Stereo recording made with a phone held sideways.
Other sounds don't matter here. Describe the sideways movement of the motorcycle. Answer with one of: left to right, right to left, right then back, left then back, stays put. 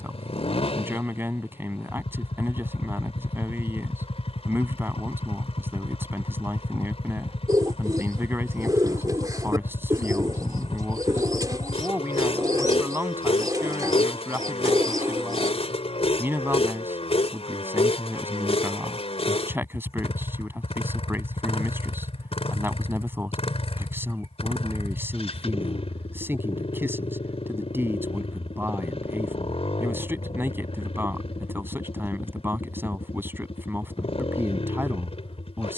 stays put.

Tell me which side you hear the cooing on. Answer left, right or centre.
right.